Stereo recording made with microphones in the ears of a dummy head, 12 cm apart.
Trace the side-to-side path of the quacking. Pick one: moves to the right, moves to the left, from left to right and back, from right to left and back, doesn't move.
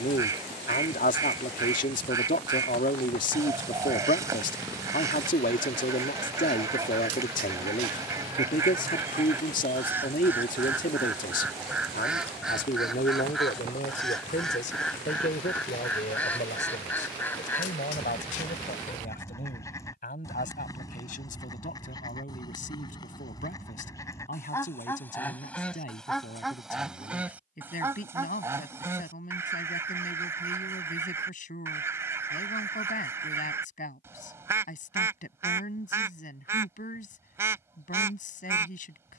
from right to left and back.